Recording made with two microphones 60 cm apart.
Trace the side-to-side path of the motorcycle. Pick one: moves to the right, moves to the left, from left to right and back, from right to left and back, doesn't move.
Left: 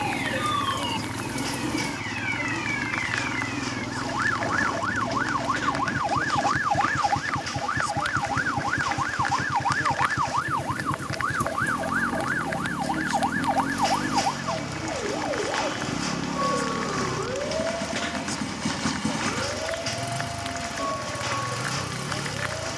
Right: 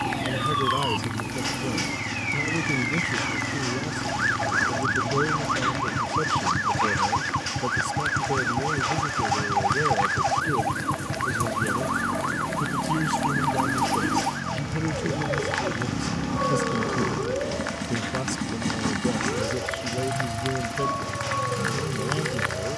doesn't move.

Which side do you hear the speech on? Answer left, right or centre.
right.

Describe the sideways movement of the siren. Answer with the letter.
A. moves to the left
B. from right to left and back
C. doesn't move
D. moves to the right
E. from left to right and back
D.